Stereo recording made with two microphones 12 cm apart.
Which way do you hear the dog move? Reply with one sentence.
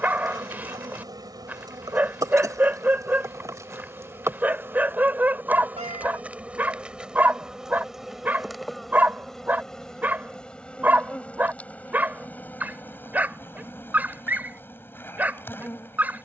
You can hear the dog stay in one place.